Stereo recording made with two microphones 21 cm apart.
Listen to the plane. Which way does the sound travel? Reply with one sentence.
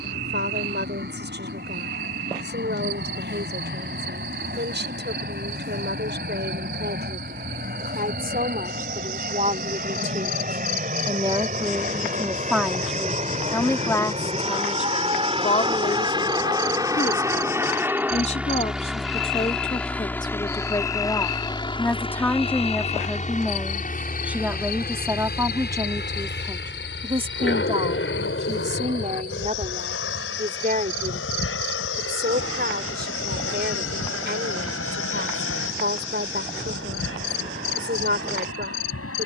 You can hear the plane travel towards the left.